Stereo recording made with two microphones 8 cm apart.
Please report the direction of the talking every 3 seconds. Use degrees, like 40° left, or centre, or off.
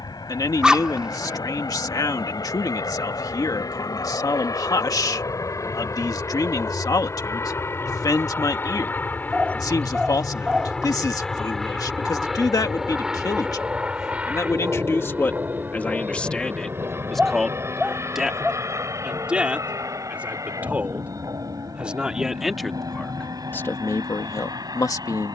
50° left, 50° left, 50° left, 50° left, 50° left, 10° left, 10° right, 10° left, 50° left.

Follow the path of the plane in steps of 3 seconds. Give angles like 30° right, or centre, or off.
60° left, 50° left, 40° left, 10° left, 10° right, 30° right, 40° right, 50° right, 50° right.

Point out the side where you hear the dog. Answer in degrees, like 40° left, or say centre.
10° right.